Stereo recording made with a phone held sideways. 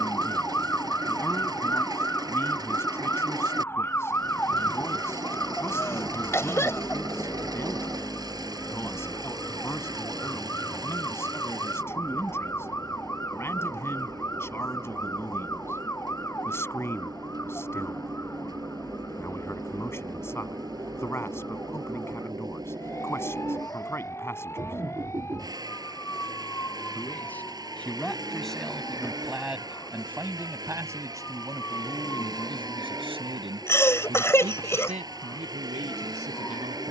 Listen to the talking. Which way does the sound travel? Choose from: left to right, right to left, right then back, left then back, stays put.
left to right.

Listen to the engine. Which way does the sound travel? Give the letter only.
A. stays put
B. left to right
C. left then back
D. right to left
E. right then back
A.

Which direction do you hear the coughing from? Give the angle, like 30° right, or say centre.
20° left.